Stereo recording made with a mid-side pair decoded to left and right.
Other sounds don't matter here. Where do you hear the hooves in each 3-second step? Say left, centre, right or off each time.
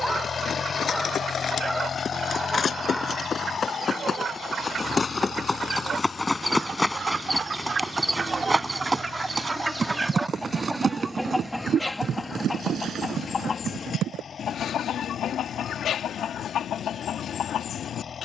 left, left, centre, right, right, off.